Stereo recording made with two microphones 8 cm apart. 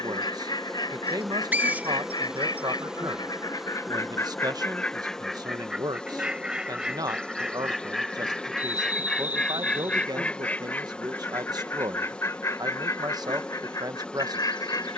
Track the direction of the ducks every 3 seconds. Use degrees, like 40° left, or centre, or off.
60° left, 30° left, centre, 20° left, 40° left.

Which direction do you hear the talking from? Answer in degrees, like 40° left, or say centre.
50° right.